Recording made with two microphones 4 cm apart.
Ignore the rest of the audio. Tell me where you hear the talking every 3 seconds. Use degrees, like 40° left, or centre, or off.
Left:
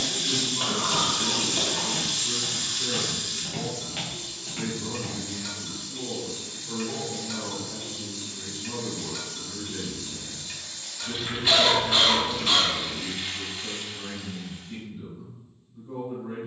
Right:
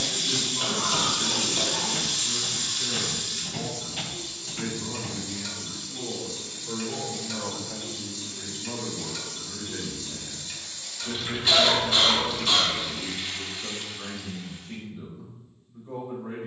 20° left, centre, 50° right, 80° right, 80° right, 80° right.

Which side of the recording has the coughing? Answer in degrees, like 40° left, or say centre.
10° left.